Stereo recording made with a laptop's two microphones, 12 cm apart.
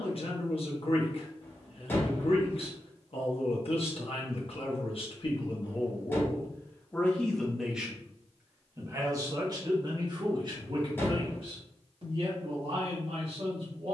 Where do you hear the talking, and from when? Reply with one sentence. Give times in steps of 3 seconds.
You can hear the talking on the left from 0 s, in the centre from 6 s and on the right from 9 s.